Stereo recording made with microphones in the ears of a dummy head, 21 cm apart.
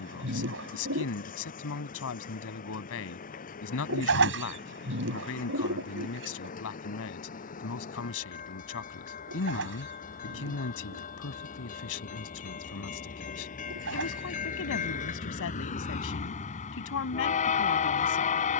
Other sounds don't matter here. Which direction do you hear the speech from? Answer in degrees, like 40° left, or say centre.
60° left.